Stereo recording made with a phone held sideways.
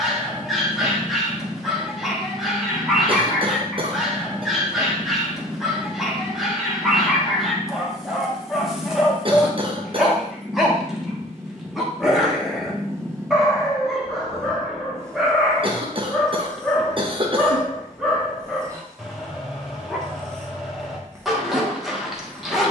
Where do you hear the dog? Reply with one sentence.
You can hear the dog in the centre.